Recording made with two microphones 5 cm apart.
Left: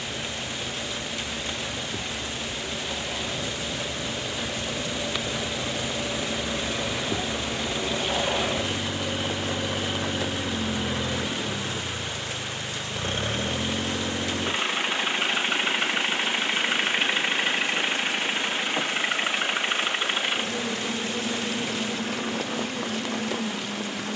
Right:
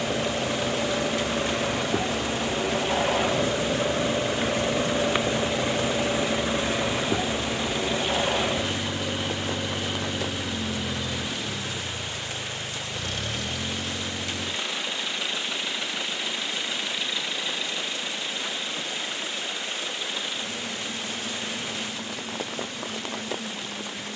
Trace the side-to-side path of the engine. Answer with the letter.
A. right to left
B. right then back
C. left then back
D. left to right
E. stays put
A.